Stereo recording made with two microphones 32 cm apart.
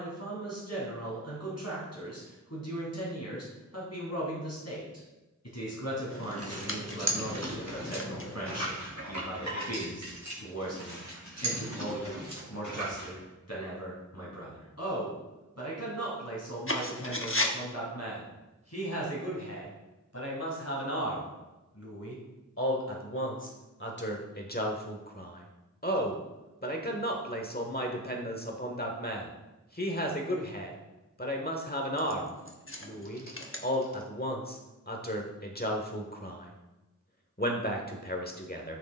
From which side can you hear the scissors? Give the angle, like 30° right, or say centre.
40° left.